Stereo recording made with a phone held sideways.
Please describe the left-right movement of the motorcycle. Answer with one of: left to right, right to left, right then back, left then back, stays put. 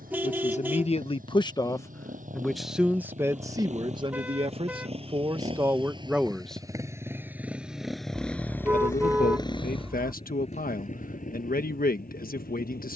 right to left.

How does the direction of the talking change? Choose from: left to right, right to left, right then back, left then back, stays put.
right then back.